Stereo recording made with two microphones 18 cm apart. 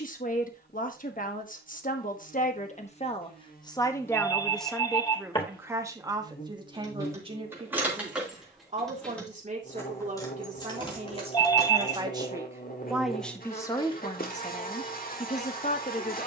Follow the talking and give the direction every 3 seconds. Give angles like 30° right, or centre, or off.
50° left, centre, 30° right, 40° right, 20° left, 40° left.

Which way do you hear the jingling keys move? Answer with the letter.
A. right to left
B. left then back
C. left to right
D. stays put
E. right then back
A.